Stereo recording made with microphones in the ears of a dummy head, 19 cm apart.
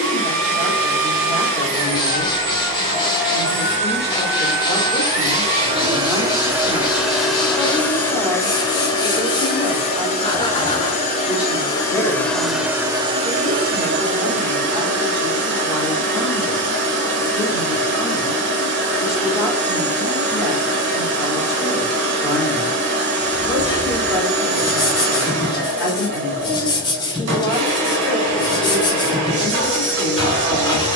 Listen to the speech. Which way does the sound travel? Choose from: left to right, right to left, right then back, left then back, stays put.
stays put.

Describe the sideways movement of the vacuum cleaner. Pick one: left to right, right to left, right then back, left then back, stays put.
left then back.